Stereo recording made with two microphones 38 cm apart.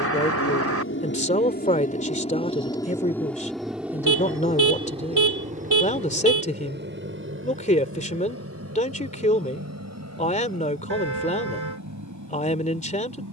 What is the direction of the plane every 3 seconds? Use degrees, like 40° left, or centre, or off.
30° left, 10° right, 30° right, 40° right, 50° right.